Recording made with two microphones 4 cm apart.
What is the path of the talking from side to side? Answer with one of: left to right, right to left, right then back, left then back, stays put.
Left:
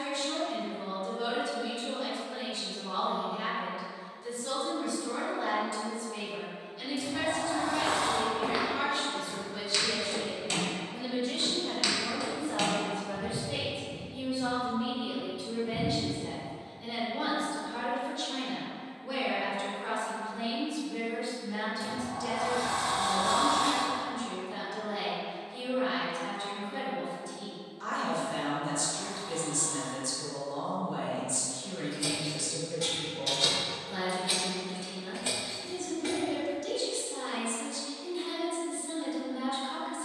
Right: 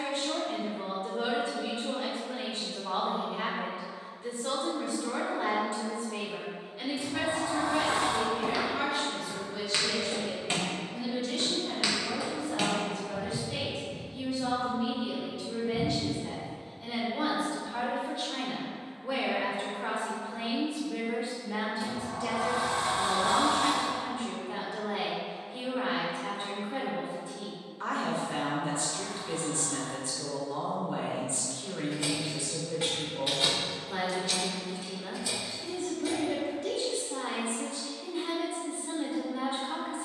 left then back.